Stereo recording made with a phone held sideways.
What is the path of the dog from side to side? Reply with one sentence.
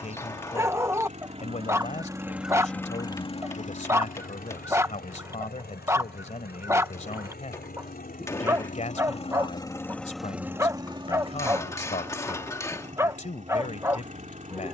In this clip you hear the dog stay in one place.